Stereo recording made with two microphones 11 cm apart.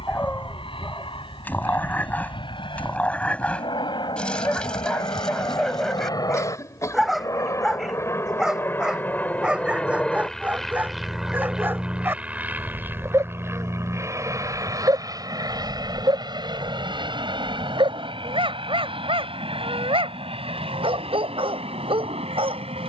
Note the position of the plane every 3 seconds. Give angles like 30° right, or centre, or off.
60° left, 50° left, 30° left, centre, 20° right, 40° right, 50° right, 60° right.